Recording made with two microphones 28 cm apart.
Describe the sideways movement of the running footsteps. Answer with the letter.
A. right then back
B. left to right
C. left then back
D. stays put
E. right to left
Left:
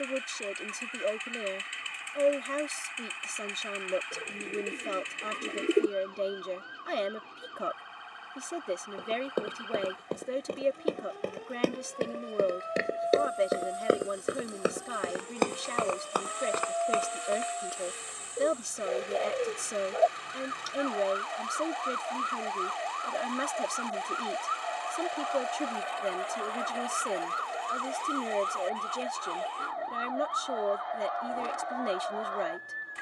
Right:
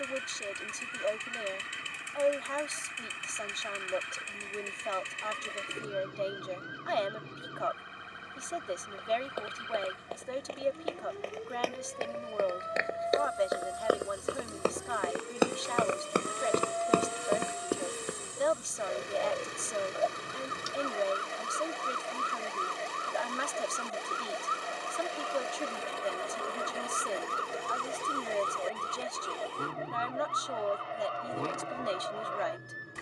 B.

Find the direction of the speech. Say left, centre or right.
left.